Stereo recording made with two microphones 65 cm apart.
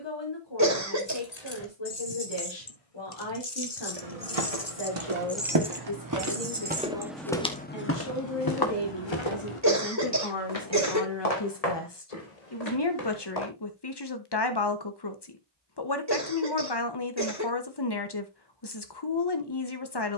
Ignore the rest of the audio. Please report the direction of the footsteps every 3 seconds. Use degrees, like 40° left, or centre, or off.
off, 50° right, 10° left, 50° left, 60° left, off, off.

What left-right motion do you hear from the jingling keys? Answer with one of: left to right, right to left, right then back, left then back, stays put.
left to right.